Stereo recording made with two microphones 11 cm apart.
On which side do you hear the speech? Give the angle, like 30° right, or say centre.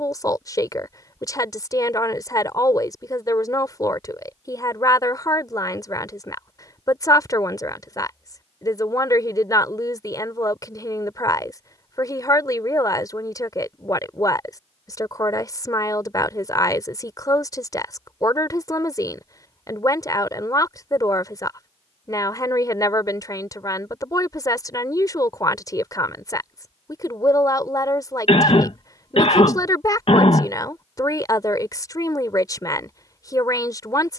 30° left.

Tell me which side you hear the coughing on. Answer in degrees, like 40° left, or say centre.
50° left.